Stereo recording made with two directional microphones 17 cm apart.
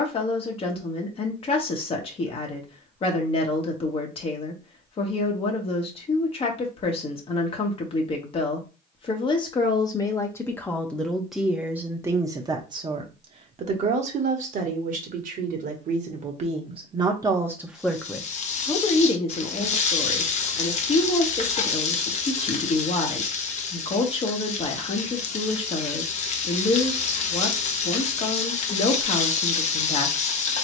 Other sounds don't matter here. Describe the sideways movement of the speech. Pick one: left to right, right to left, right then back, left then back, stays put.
right then back.